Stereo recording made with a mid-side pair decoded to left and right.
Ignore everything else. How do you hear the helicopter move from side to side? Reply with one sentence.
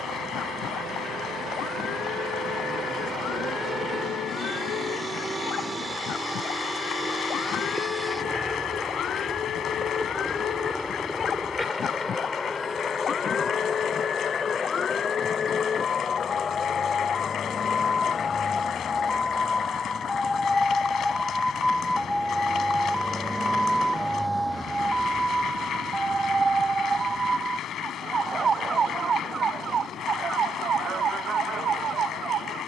You can hear the helicopter go from the right side to the left.